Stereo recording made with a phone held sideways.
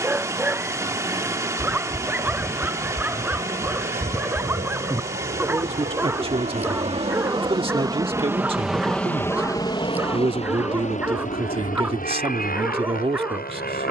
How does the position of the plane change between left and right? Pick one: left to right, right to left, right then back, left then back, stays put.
right to left.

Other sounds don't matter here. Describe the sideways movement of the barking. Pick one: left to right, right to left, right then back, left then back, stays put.
stays put.